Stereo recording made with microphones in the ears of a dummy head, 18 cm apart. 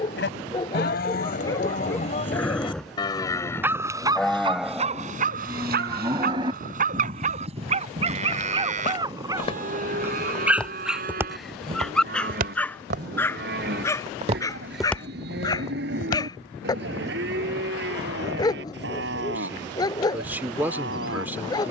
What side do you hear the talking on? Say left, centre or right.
centre.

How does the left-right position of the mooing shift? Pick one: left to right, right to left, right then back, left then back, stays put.
left to right.